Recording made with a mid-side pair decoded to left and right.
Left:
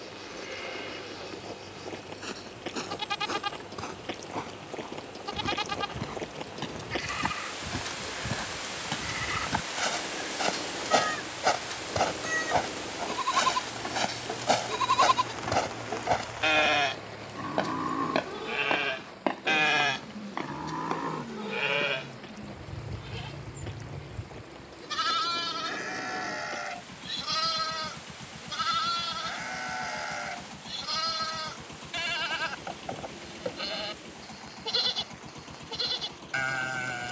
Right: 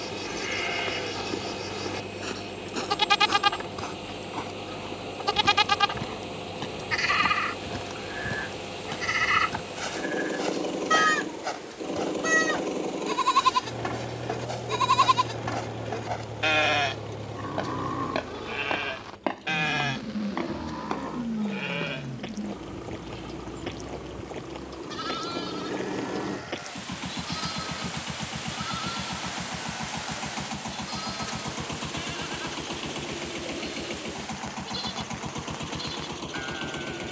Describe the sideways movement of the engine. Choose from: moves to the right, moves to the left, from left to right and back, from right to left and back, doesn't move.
doesn't move.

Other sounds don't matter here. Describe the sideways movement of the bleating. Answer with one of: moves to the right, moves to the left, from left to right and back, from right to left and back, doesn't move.
moves to the left.